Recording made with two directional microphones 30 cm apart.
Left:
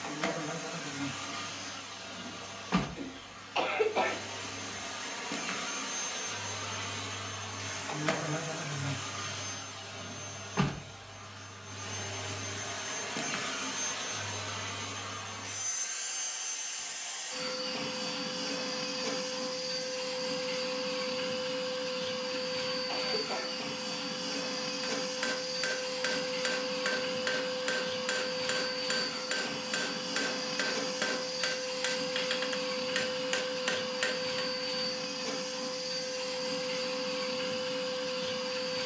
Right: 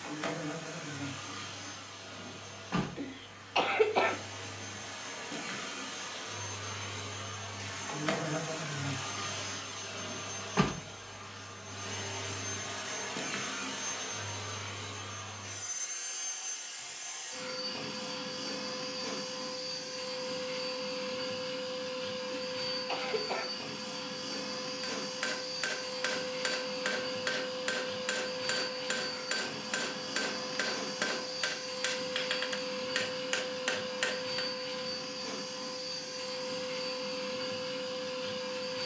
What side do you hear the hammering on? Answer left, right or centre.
centre.